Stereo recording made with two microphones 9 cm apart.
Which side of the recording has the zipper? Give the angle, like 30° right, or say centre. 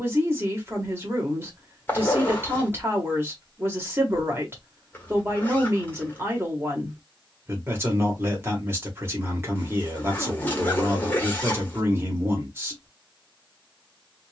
20° left.